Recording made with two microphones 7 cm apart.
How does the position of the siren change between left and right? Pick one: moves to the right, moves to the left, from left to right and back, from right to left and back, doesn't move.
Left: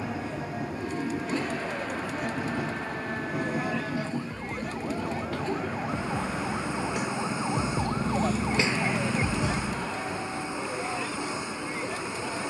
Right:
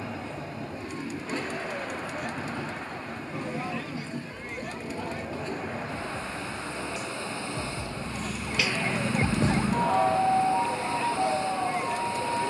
moves to the right.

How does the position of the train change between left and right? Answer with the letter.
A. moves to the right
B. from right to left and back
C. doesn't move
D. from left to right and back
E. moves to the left
C.